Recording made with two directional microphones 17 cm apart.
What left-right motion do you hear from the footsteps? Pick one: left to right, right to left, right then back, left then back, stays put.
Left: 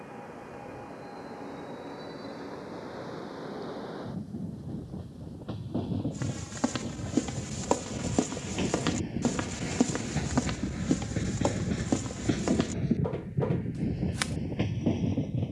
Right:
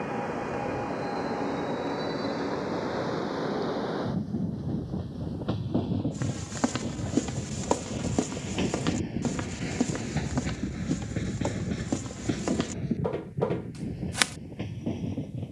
left then back.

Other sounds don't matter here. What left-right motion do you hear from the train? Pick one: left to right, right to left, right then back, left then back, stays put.
right to left.